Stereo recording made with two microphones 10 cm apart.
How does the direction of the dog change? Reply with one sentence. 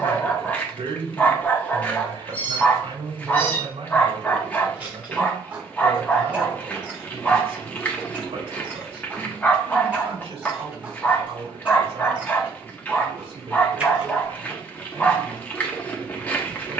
In this clip you hear the dog stay in one place.